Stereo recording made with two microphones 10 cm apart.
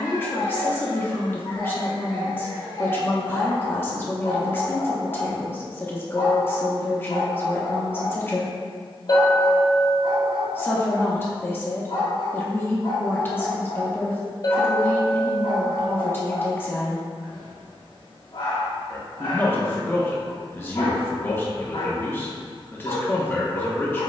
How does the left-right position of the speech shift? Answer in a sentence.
You can hear the speech stay put.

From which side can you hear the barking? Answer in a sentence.
You can hear the barking on the left.